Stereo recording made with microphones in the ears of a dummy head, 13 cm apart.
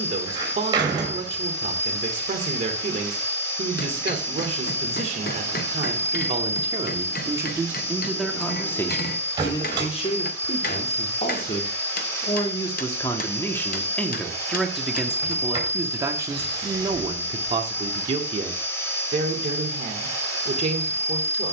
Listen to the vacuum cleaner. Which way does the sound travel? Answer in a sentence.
You can hear the vacuum cleaner stay put.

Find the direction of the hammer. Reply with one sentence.
You can hear the hammer on the left.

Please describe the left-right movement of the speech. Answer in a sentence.
In this clip you hear the speech move from right to left and back again.